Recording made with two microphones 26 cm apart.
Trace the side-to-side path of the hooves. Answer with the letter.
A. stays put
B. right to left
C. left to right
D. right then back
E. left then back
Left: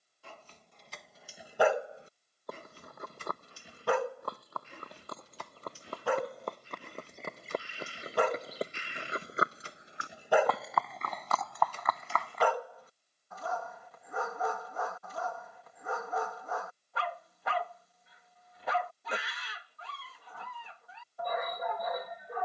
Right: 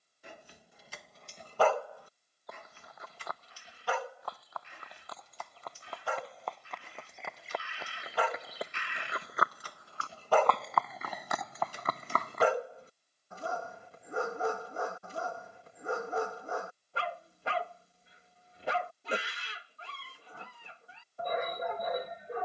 C.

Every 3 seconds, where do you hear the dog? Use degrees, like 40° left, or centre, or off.
10° left, 60° left, 60° left, 10° left, 30° right, 30° right, 30° right, 30° right.